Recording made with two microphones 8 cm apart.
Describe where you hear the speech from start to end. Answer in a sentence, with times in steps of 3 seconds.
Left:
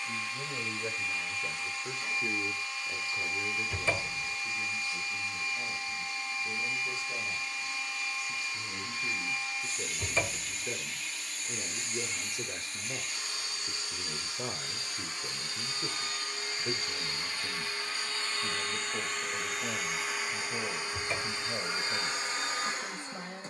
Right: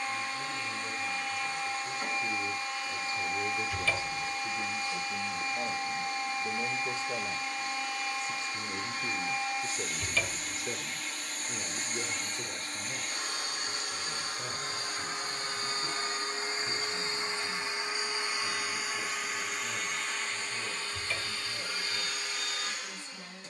You can hear the speech on the left from 0 s, on the right from 3 s, in the centre from 9 s and on the left from 12 s.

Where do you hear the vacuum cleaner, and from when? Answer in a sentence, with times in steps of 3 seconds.
In this clip you hear the vacuum cleaner on the right from 0 s, in the centre from 18 s and on the left from 21 s.